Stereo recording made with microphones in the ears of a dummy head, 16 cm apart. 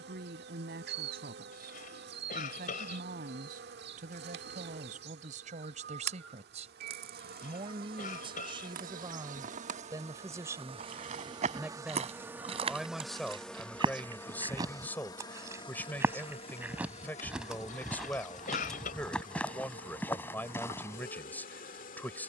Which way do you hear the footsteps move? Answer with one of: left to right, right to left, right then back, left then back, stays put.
right to left.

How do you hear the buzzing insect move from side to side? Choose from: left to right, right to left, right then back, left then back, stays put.
right to left.